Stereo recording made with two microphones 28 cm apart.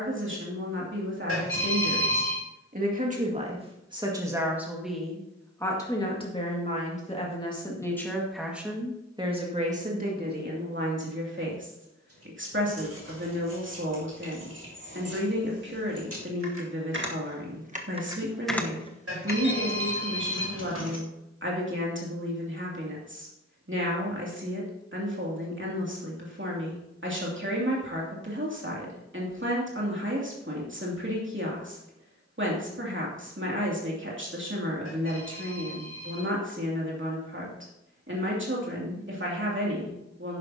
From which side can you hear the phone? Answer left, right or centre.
right.